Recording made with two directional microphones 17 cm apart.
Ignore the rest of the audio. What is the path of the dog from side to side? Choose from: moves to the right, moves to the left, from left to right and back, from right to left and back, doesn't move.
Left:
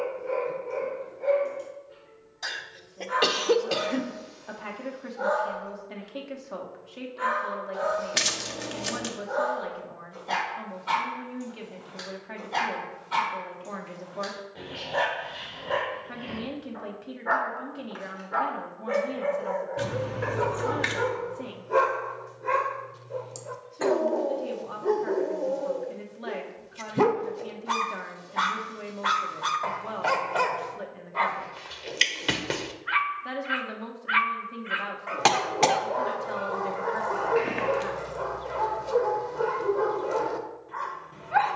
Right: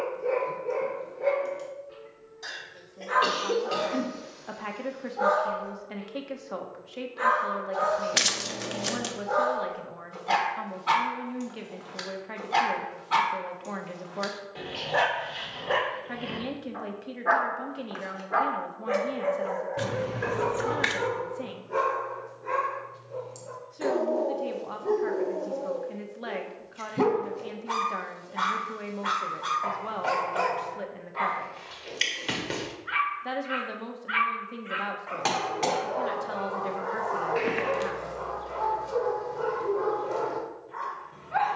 moves to the left.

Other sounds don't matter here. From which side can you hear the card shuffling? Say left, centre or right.
centre.